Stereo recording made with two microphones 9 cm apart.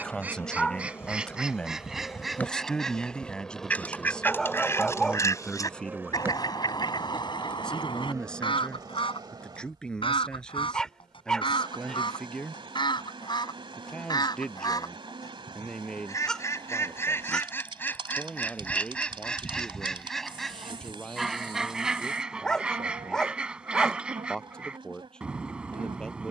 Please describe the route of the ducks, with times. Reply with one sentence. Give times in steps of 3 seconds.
You can hear the ducks in the centre from 0 s, on the left from 3 s and in the centre from 18 s.